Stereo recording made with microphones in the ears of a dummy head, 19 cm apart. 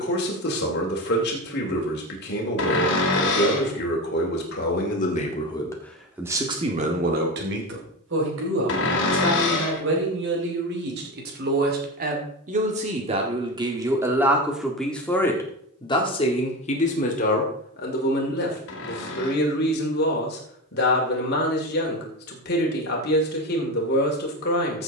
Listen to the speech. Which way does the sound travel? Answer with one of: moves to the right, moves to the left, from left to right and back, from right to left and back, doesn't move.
from left to right and back.